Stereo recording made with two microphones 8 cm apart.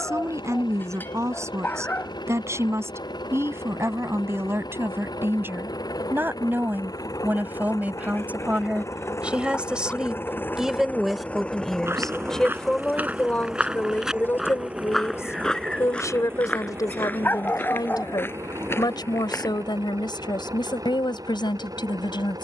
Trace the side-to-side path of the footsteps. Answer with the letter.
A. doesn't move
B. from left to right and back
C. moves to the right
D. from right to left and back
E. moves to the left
E.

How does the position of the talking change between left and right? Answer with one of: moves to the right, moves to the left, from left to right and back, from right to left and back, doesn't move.
moves to the left.